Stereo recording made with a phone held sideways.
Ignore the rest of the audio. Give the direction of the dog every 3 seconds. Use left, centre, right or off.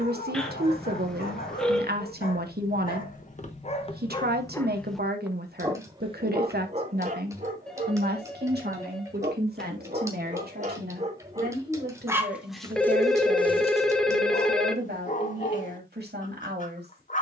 left, left, right, right, left, left.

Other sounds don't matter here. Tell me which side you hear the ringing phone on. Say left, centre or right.
centre.